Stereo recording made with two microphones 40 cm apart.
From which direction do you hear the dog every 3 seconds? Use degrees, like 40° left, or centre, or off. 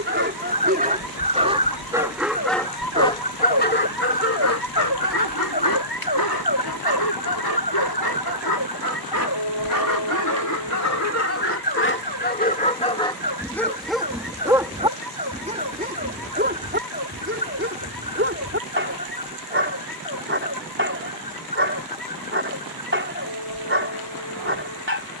10° right, 40° left, 70° left, 50° left, 10° left, 30° right, 30° right, 30° right, 30° right.